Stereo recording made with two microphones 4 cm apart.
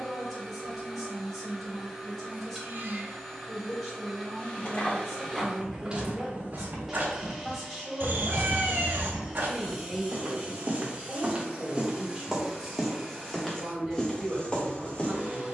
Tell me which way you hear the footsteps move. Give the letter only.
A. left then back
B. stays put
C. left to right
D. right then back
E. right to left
D.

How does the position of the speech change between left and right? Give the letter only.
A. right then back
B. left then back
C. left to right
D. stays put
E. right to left
D.